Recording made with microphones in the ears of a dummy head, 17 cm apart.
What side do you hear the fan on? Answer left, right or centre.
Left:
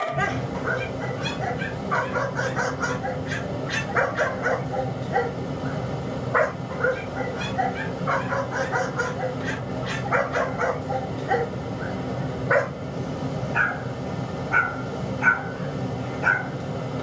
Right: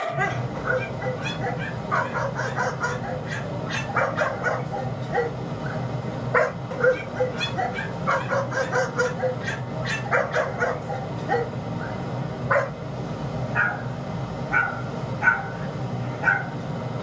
left.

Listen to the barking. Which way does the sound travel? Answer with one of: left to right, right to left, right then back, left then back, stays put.
right then back.